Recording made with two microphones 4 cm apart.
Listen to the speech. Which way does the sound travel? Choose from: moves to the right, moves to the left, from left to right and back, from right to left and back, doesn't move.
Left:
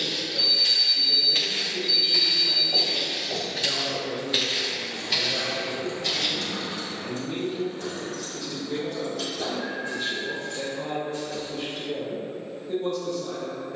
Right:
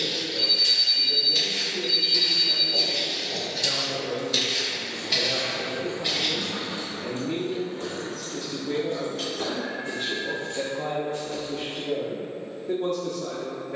moves to the right.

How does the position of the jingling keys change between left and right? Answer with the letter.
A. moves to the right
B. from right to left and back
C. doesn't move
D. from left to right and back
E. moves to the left
A.